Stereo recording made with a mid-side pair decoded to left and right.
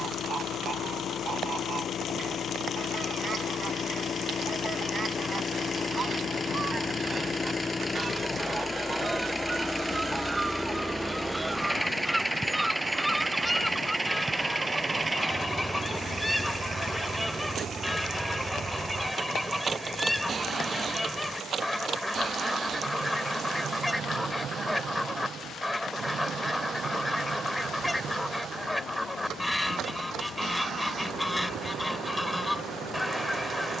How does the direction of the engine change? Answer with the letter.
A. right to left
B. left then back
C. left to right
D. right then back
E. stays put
C.